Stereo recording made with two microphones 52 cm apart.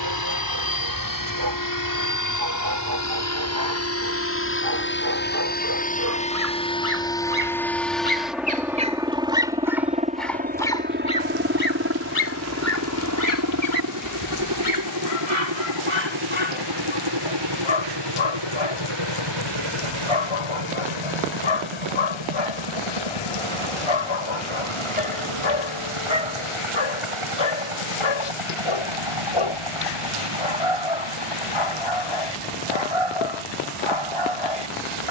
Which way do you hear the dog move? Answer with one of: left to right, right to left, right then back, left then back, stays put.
right to left.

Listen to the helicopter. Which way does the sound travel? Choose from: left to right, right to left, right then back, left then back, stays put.
left to right.